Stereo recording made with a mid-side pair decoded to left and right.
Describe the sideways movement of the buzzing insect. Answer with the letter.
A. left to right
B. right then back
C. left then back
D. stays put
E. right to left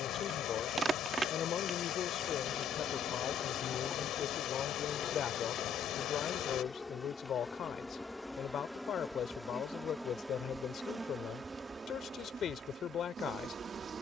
C.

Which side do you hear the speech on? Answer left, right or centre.
left.